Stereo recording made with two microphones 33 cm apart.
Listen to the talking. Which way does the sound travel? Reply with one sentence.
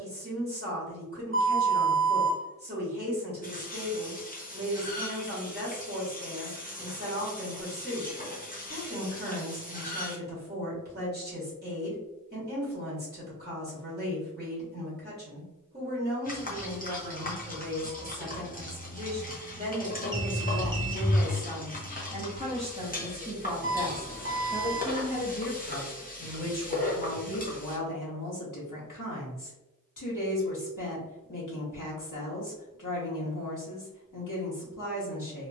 In this clip you hear the talking move from right to left.